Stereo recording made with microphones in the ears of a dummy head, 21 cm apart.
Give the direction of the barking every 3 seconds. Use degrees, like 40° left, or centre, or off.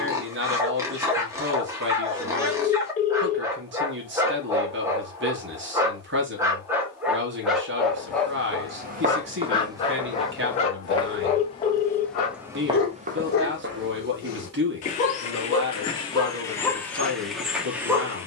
10° right, 10° right, centre, 30° left, 40° left, 10° left.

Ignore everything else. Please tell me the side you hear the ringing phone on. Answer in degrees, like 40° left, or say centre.
30° left.